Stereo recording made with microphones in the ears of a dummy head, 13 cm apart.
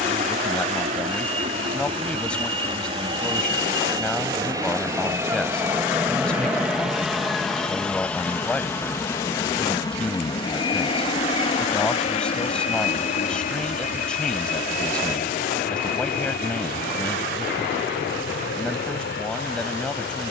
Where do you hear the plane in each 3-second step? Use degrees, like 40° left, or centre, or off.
40° right, 20° right, centre, 30° left, 50° left, 60° left, 70° left.